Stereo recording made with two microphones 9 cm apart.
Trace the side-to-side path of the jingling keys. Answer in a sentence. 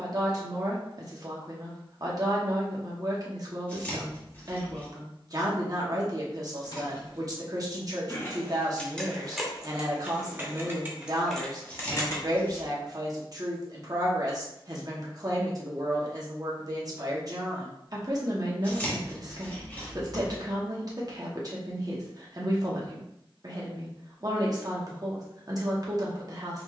In this clip you hear the jingling keys go right and come back.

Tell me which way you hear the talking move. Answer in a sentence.
You can hear the talking stay put.